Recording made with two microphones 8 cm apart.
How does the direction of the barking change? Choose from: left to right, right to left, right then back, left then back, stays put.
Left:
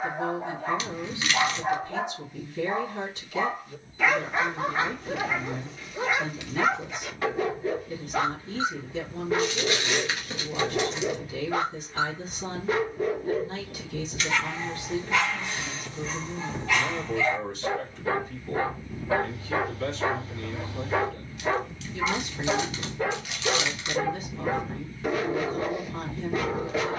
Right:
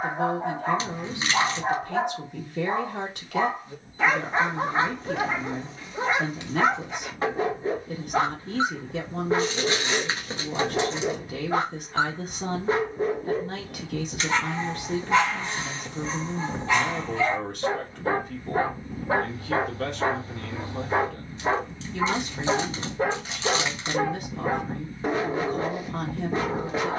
stays put.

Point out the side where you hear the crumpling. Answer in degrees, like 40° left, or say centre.
30° right.